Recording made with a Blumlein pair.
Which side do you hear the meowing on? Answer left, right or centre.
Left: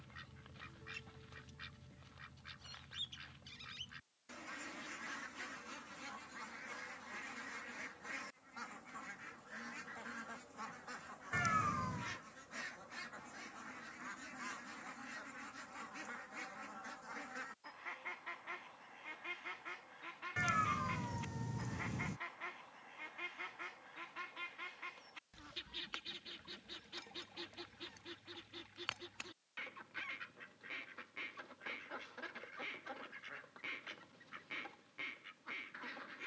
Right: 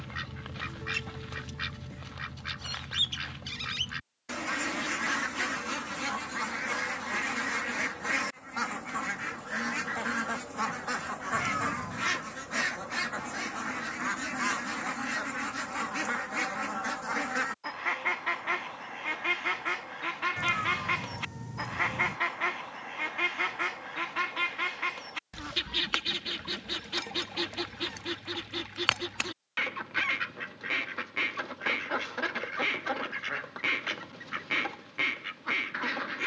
centre.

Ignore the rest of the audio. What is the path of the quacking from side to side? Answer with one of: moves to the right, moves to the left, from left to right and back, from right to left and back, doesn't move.
doesn't move.